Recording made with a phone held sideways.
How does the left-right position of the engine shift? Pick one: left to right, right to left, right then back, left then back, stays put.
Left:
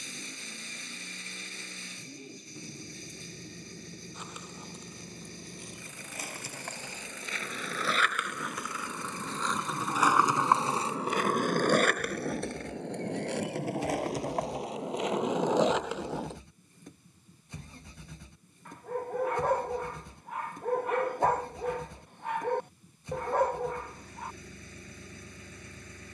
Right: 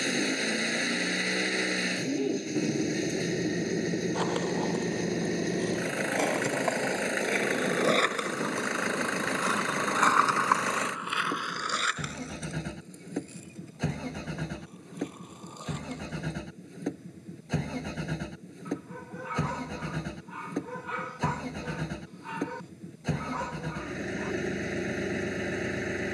stays put.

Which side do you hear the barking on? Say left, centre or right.
left.